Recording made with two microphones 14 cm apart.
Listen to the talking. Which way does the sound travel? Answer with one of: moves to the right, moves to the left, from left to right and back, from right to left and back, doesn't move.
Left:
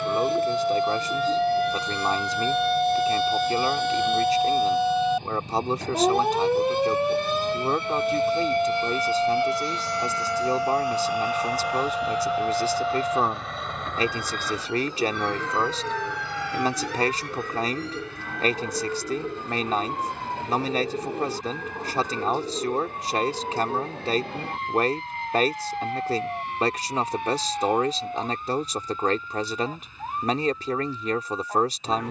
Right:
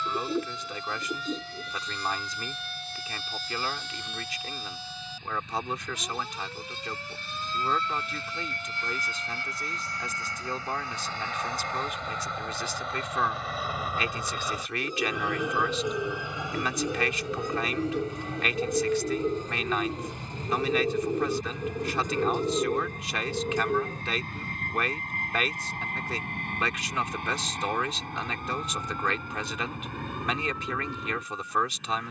doesn't move.